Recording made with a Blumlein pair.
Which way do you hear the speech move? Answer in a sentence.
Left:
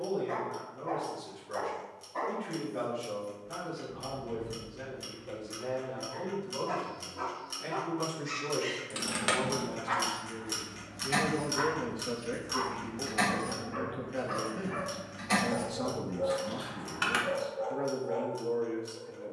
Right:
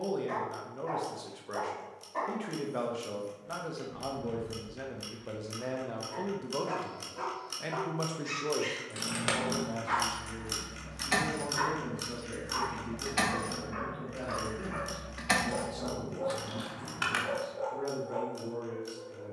In this clip you hear the speech move from right to left.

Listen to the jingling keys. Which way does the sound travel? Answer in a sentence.
In this clip you hear the jingling keys move from left to right and back again.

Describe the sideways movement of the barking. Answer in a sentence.
In this clip you hear the barking stay in one place.